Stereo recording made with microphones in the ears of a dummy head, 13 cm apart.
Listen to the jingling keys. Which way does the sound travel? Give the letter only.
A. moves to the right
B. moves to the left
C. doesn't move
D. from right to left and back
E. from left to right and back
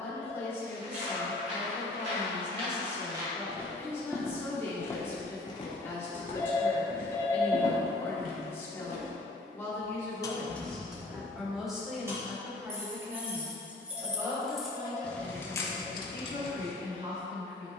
E.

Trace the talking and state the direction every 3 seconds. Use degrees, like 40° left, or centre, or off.
20° left, 20° left, 20° left, 10° left, 20° right, 40° right.